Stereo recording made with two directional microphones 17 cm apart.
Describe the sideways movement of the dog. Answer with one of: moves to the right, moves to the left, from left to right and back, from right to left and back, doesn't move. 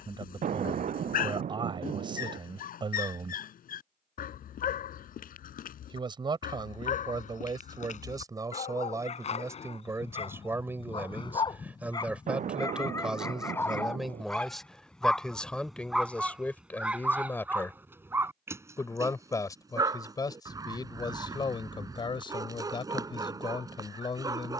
moves to the right.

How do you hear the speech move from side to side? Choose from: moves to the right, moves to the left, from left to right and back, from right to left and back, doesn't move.
moves to the left.